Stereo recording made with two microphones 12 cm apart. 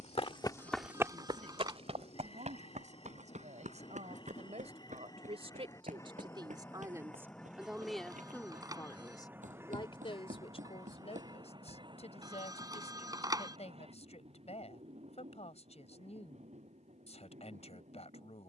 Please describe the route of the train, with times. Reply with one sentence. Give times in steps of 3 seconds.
In this clip you hear the train on the left from 0 s, in the centre from 6 s and on the right from 9 s.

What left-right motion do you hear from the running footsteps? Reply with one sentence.
You can hear the running footsteps travel towards the right.